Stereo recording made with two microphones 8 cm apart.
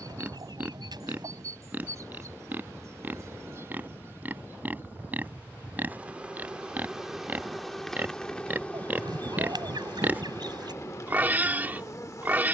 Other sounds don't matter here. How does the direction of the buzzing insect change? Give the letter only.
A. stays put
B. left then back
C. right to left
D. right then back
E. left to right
C.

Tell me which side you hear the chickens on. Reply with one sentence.
You can hear the chickens on the right.